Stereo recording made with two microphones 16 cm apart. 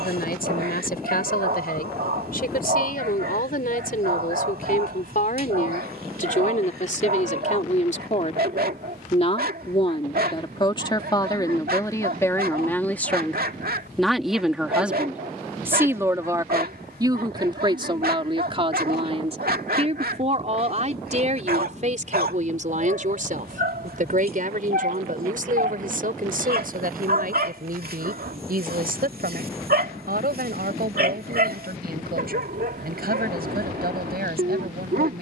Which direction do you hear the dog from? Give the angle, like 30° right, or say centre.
70° right.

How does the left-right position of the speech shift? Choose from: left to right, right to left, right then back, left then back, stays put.
left to right.